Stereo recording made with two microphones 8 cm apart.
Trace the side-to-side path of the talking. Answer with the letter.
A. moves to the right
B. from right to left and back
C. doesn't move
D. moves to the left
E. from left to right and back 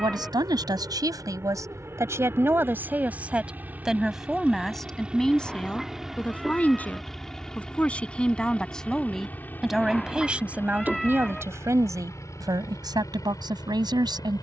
B.